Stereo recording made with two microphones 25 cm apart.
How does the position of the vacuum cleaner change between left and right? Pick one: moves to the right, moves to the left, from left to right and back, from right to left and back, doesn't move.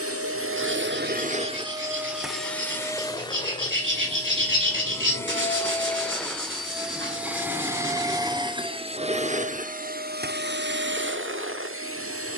from right to left and back.